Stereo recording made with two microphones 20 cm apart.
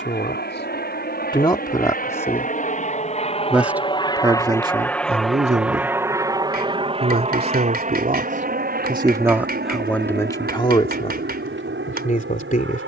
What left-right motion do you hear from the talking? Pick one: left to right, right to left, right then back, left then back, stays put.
right then back.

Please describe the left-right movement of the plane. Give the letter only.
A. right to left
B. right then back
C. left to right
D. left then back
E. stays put
C.